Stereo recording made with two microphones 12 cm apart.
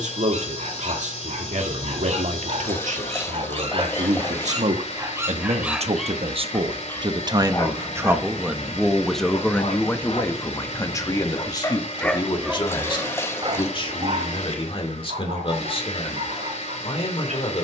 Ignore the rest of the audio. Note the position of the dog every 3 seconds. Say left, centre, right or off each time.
right, right, left, left, right, right.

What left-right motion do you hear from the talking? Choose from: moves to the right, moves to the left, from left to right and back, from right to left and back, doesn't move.
moves to the left.